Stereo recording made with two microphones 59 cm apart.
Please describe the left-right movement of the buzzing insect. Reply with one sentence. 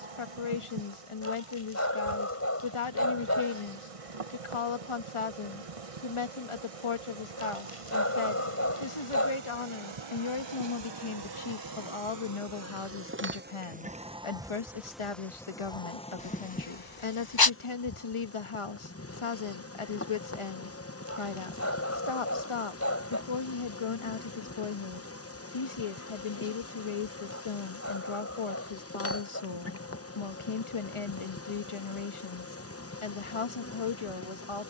In this clip you hear the buzzing insect go from the right side to the left.